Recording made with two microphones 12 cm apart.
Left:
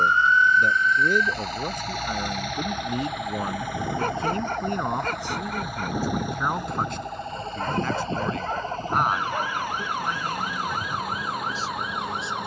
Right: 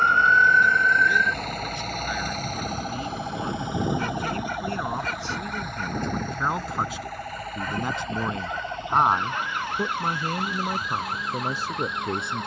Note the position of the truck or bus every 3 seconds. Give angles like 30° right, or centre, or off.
50° right, 10° right, 20° left, 40° left.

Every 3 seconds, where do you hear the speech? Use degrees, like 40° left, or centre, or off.
40° left, 20° left, 10° right, 50° right.